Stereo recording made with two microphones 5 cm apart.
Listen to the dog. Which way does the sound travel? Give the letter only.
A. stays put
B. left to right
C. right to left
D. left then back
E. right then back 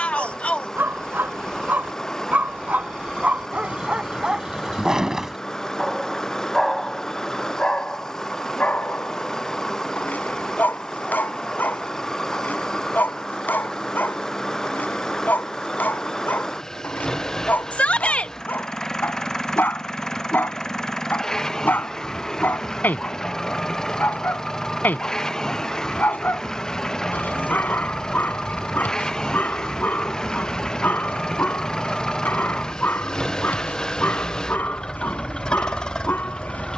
C.